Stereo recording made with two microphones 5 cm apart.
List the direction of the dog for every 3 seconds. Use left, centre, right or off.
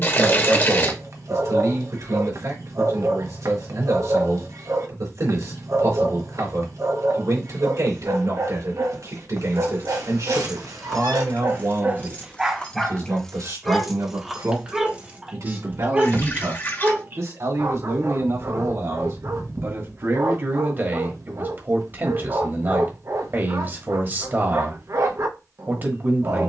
right, right, right, right, centre, right, right, right, right.